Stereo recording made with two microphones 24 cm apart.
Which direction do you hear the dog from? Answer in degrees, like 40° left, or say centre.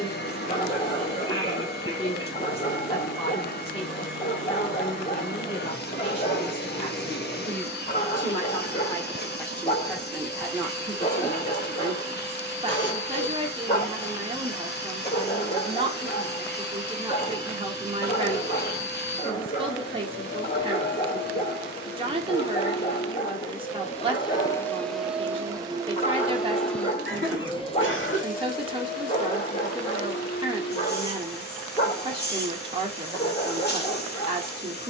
30° left.